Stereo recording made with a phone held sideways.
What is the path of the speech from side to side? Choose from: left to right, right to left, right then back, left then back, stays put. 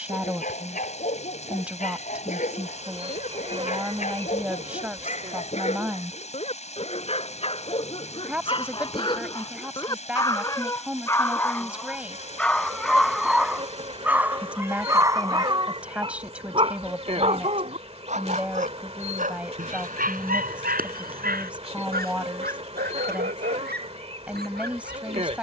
stays put.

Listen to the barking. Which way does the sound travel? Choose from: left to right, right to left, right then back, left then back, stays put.
left to right.